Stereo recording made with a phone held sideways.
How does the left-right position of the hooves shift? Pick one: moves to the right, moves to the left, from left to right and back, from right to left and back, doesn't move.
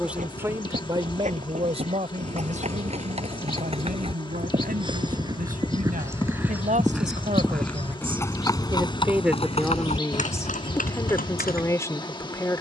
moves to the left.